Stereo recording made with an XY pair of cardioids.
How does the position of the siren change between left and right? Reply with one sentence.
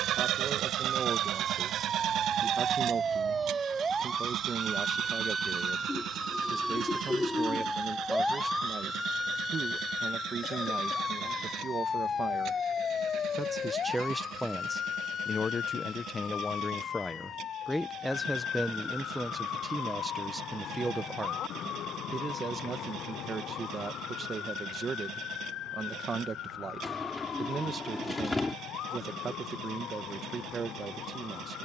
You can hear the siren move from right to left.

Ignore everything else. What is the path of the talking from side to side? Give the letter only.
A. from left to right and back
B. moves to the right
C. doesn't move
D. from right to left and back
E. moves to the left
D.